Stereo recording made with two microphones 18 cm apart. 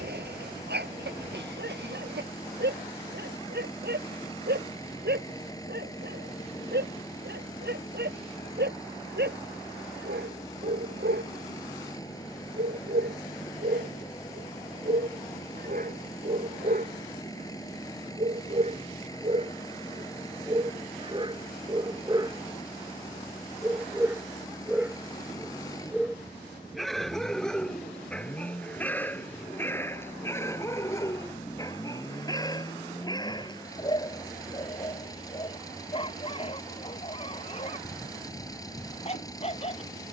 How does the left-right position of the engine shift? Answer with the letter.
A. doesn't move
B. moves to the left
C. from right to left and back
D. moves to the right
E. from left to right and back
A.